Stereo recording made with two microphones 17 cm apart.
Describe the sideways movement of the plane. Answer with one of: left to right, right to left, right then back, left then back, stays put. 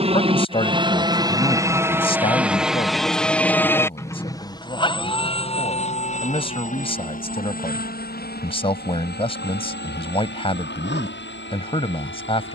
right to left.